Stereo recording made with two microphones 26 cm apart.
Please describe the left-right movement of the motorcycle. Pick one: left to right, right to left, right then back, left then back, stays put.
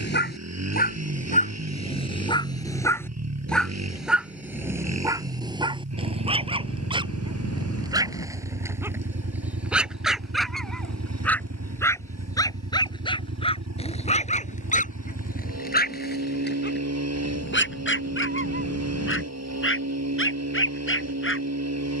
stays put.